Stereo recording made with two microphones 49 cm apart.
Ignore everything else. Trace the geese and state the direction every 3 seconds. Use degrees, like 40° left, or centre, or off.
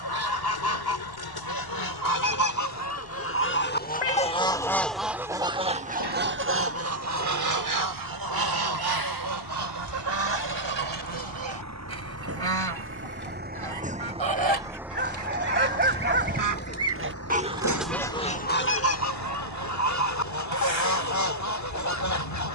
40° left, 10° left, 40° right, 60° right, 70° right, 30° right, 30° left, 40° left.